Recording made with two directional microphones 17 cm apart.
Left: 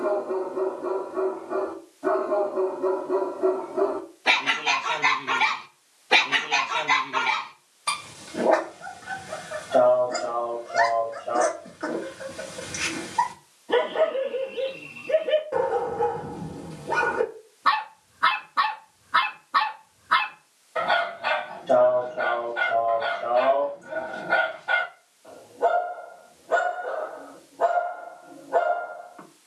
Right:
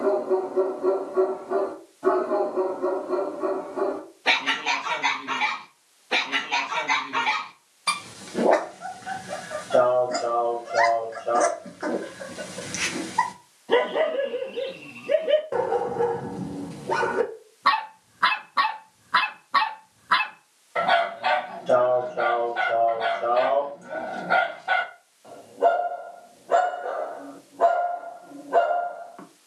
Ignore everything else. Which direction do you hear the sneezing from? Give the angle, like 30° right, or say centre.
50° right.